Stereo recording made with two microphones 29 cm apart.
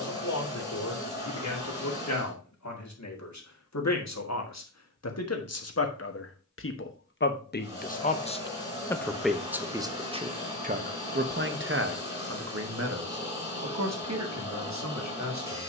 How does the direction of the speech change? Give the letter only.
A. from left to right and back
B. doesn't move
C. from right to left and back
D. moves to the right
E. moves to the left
D.